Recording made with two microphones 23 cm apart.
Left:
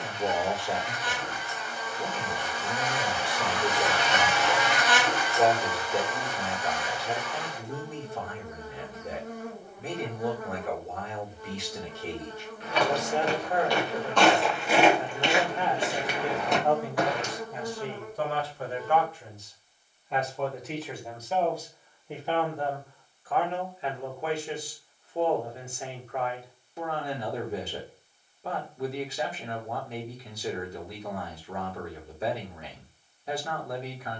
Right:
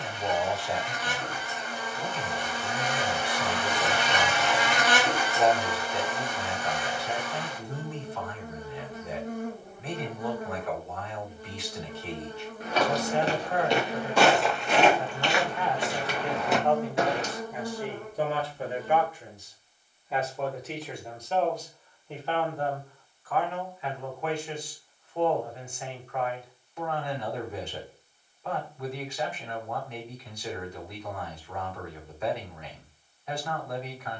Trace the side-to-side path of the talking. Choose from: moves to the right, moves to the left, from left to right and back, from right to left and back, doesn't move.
from left to right and back.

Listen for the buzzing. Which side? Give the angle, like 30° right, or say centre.
50° right.